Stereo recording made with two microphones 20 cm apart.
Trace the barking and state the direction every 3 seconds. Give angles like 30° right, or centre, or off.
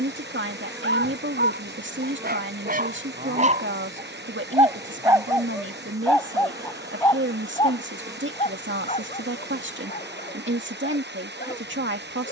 50° right, 20° right, 20° left, 40° left.